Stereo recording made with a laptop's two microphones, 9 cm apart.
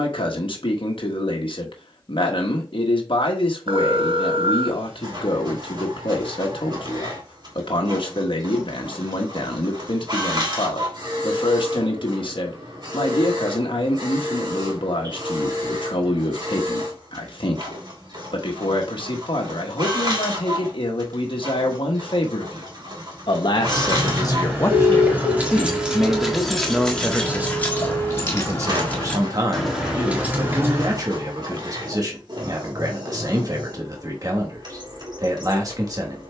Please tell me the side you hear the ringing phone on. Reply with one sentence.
You can hear the ringing phone on the right.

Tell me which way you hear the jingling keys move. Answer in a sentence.
In this clip you hear the jingling keys go left and come back.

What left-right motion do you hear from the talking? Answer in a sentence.
In this clip you hear the talking move from left to right.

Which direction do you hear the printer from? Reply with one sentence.
You can hear the printer on the right.